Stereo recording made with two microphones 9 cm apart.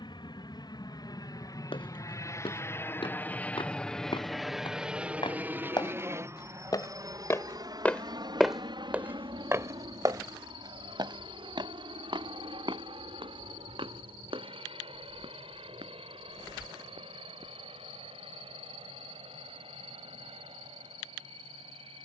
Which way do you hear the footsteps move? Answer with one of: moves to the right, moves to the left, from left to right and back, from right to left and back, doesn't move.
moves to the right.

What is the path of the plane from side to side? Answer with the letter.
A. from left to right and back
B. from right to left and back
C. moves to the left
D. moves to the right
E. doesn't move
D.